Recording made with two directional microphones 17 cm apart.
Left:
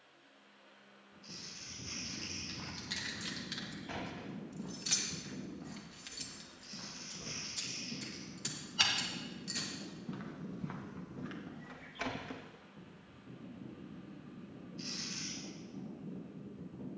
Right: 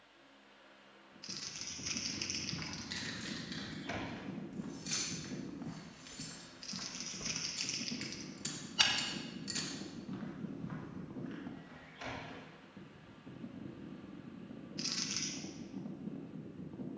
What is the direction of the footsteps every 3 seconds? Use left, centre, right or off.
right, right, right, left, left, off.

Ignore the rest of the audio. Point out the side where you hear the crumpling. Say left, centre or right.
right.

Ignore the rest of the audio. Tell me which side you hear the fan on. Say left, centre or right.
right.